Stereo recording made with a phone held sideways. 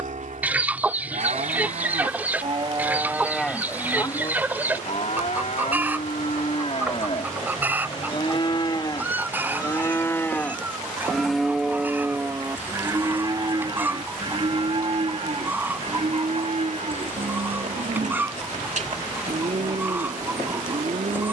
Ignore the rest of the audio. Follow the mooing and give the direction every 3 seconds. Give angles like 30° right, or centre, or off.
50° right, 30° left, 40° left, 10° left, 30° right, 50° right, 60° right.